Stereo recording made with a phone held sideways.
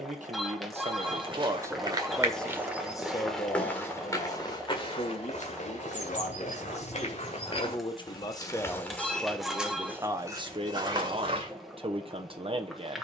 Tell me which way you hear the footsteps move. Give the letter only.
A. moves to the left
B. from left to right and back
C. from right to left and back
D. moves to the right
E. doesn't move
C.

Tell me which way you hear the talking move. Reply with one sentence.
In this clip you hear the talking move from right to left and back again.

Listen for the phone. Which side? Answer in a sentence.
You can hear the phone in the centre.